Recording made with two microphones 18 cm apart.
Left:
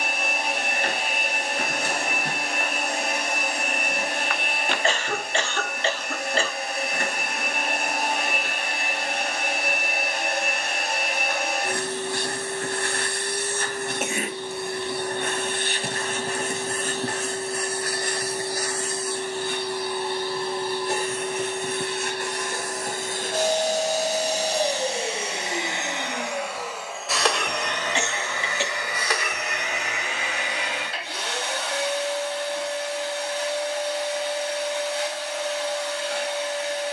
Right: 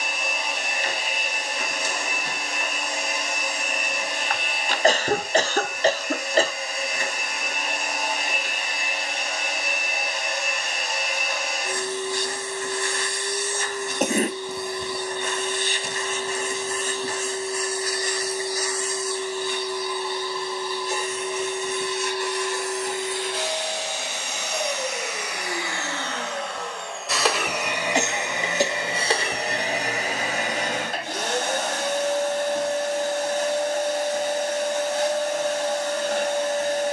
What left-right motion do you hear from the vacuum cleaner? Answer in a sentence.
In this clip you hear the vacuum cleaner move to the right.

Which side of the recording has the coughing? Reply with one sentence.
You can hear the coughing on the right.